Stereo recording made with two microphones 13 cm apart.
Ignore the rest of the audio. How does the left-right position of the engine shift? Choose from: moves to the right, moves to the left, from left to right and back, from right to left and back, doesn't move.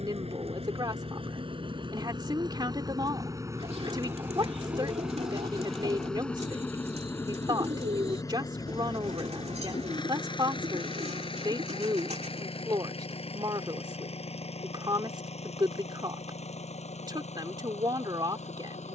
moves to the left.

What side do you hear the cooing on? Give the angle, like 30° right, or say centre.
50° right.